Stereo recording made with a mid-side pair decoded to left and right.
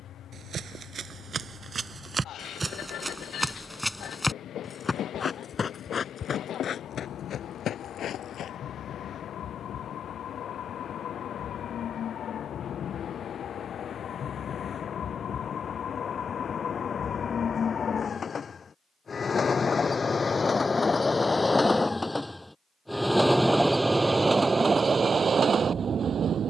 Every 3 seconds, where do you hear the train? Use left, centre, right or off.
left, left, left, left, left, left, left, centre, right.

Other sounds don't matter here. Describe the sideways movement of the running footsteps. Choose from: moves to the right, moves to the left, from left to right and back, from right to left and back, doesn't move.
moves to the left.